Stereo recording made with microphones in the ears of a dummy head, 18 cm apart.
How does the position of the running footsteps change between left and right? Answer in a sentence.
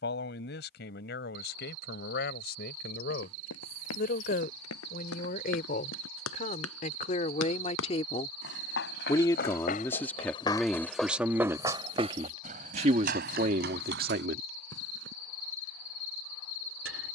In this clip you hear the running footsteps move to the right.